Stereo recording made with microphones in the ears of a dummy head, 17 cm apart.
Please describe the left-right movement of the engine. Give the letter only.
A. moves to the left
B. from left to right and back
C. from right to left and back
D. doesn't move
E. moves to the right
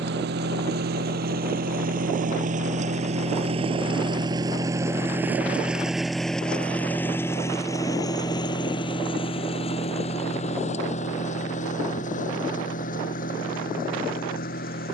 A.